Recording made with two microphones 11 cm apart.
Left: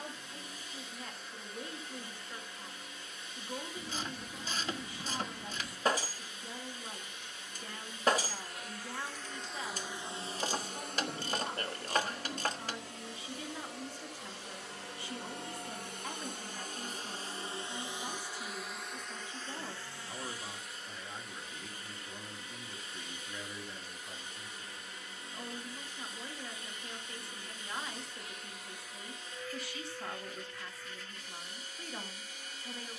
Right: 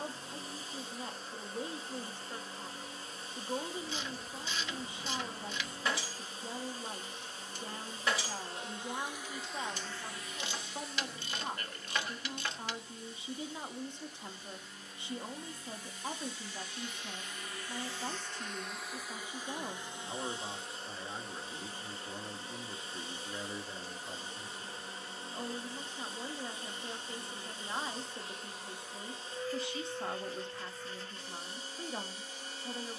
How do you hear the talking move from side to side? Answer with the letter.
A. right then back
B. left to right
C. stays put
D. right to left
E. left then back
C.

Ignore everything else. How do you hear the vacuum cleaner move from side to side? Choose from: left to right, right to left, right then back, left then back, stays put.
left then back.